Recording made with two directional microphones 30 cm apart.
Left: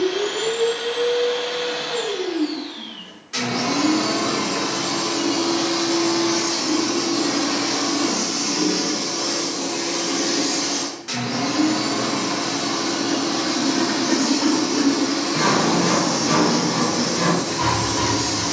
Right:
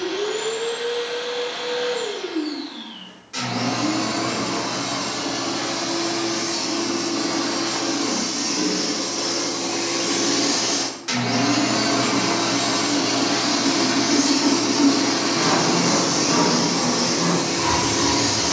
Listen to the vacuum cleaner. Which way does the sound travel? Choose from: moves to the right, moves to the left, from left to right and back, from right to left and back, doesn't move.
moves to the right.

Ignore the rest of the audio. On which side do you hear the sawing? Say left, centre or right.
left.